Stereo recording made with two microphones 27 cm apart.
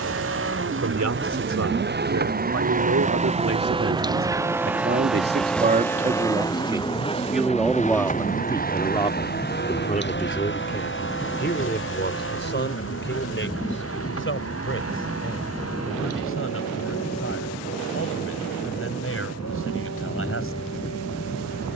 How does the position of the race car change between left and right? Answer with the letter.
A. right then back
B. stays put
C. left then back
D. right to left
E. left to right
D.